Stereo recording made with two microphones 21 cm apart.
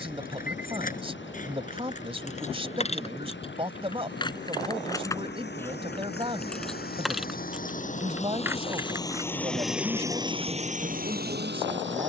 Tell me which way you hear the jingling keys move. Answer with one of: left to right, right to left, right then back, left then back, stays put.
left to right.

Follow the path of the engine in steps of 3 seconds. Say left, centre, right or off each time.
left, left, left, right.